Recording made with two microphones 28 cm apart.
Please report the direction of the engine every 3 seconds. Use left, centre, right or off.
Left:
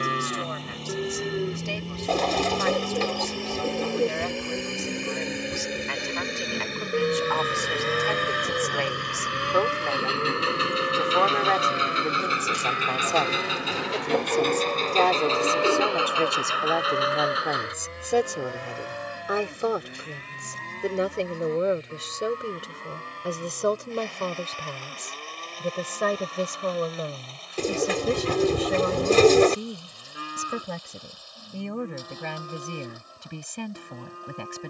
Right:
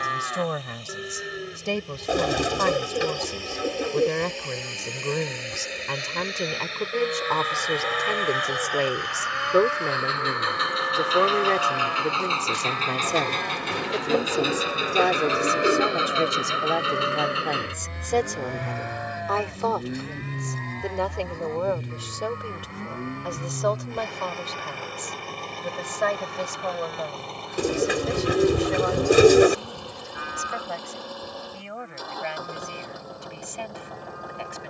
left, left, left, left, centre, right, right, right, right, right, right, right.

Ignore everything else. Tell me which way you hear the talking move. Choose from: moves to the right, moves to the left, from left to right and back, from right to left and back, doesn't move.
moves to the left.